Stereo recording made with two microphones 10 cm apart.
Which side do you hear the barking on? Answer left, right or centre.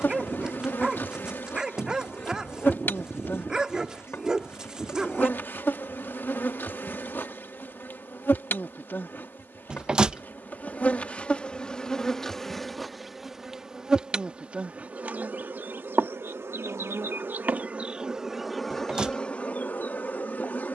centre.